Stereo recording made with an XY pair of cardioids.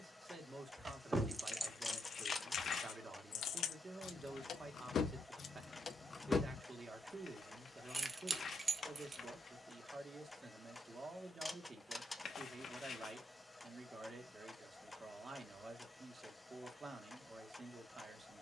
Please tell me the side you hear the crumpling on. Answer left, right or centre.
left.